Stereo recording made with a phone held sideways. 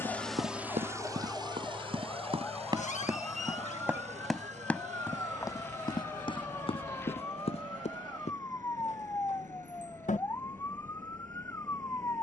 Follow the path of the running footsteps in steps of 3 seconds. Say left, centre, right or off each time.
right, centre, left, off.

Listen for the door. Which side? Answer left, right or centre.
left.